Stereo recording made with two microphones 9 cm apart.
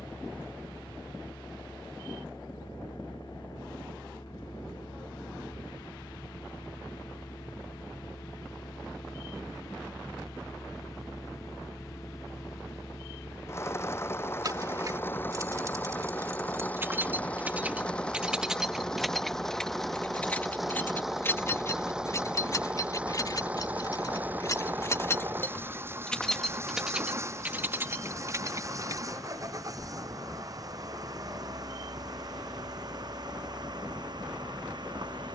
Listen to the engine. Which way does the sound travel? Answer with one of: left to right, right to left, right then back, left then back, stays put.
left to right.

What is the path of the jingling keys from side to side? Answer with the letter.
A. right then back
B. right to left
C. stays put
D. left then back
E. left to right
D.